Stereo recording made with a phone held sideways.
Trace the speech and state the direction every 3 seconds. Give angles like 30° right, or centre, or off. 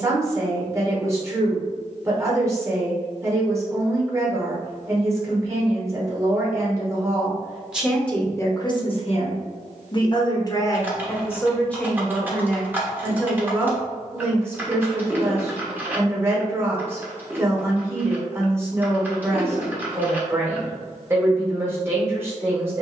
20° right, 20° right, centre, 30° left, 10° right, 20° right, 20° right, 20° right.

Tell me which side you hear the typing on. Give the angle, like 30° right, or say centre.
10° right.